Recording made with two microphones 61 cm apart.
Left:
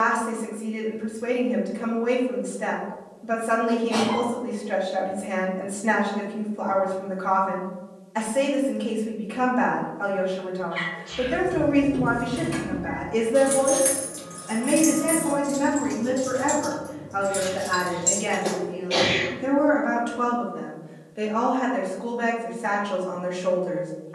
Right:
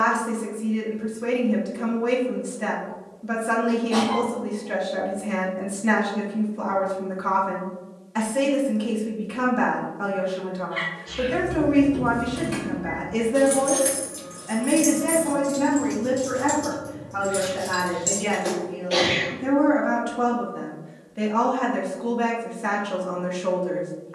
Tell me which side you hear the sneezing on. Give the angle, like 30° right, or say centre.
30° left.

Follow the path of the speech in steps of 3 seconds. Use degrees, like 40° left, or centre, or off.
40° right, 40° right, 40° right, 40° right, 20° right, 10° left, 10° right, 30° right.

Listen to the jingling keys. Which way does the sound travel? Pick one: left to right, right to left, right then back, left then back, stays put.
left then back.